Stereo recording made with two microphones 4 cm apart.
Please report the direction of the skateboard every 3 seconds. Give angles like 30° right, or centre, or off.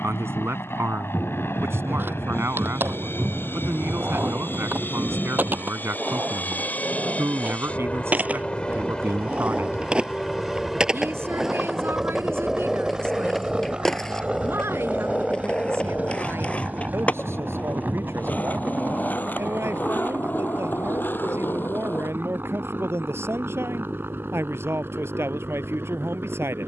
60° right, 50° right, 40° right, 20° right, centre, 30° left, 40° left, 50° left, off.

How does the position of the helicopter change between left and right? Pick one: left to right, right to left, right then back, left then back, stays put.
left to right.